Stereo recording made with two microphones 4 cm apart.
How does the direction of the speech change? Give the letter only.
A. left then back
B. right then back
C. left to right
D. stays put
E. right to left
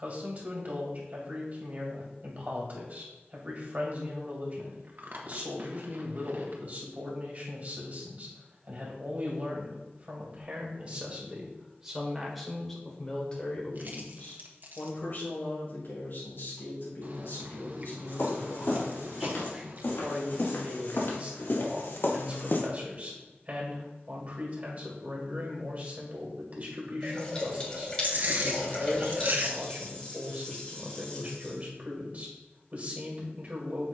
A.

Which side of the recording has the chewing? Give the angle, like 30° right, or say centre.
50° right.